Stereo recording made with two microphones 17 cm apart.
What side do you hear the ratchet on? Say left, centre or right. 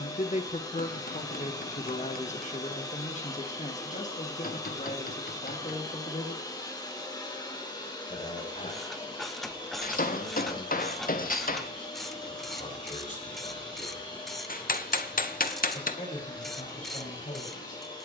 centre.